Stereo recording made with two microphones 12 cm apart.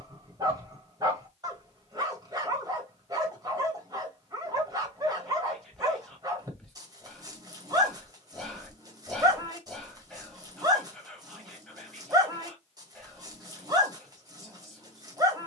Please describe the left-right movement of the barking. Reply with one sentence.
In this clip you hear the barking stay put.